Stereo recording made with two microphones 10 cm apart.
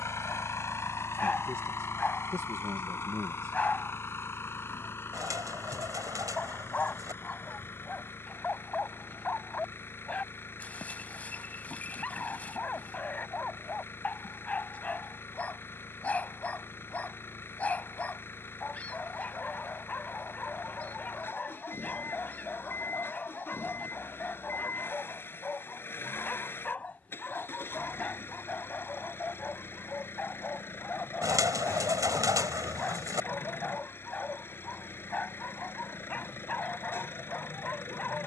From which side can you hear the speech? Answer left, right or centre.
right.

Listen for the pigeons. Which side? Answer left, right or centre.
right.